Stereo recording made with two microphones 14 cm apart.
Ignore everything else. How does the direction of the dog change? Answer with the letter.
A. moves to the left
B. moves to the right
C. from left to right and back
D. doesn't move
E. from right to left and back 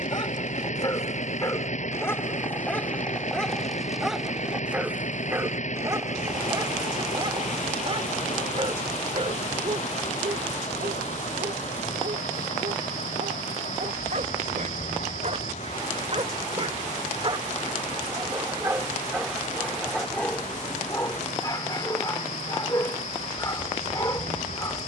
C.